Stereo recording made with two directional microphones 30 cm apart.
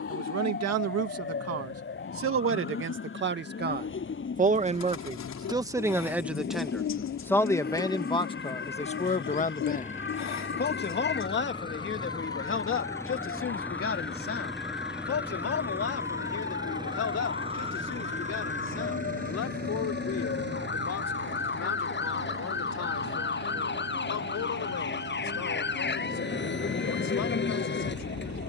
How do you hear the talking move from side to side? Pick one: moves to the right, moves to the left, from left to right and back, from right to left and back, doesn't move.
moves to the left.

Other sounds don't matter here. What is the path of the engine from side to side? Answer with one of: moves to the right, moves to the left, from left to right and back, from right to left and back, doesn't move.
moves to the right.